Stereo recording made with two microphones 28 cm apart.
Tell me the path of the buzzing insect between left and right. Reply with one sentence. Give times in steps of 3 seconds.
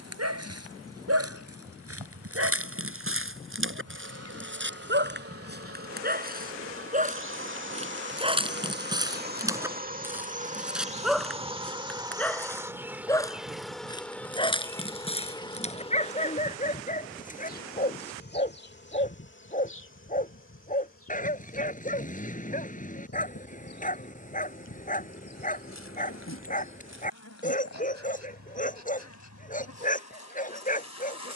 In this clip you hear the buzzing insect on the right from 0 s, in the centre from 12 s and on the left from 15 s.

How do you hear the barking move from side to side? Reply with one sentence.
In this clip you hear the barking move to the left.